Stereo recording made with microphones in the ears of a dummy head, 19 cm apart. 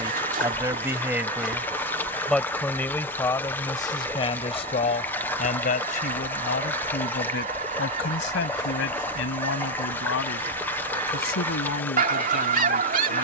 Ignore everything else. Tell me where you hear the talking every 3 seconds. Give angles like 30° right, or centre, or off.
10° right, 30° left, 50° left, 70° left, 80° left.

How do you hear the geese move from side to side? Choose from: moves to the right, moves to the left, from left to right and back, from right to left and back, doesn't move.
doesn't move.